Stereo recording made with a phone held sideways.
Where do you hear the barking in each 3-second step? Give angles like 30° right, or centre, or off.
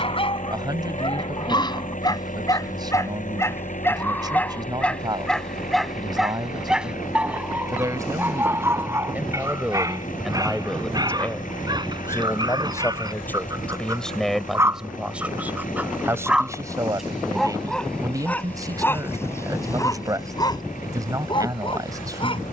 30° left, 10° left, 10° right, 30° right, 30° right, centre, 20° left, 40° left.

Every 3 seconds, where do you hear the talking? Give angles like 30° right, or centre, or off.
30° right, 30° right, 30° right, centre, 10° left, 20° right, 30° right, 30° right.